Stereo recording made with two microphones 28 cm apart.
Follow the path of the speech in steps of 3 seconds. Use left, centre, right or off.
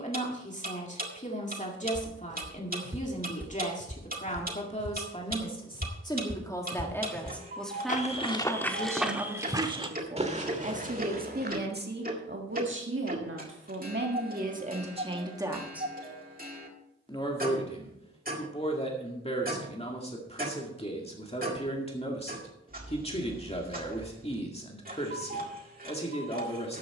left, left, centre, right, right, centre, left, left, left.